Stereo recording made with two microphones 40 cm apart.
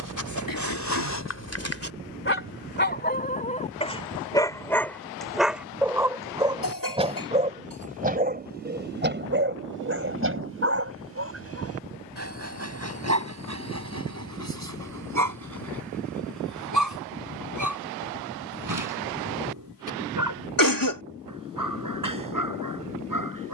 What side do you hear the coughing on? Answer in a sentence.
In this clip you hear the coughing on the left.